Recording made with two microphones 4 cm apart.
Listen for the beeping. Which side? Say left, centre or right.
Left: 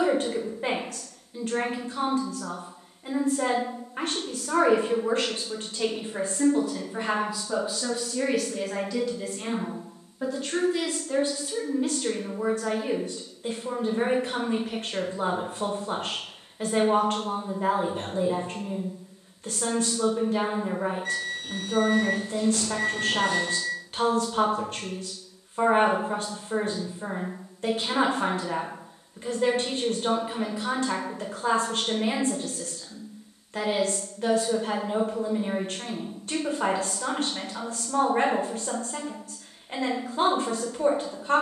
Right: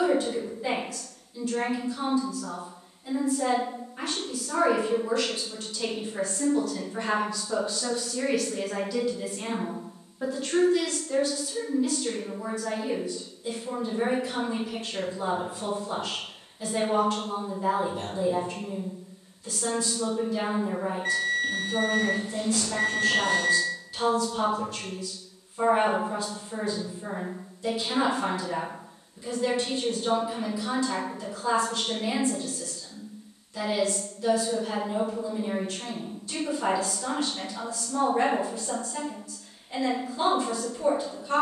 right.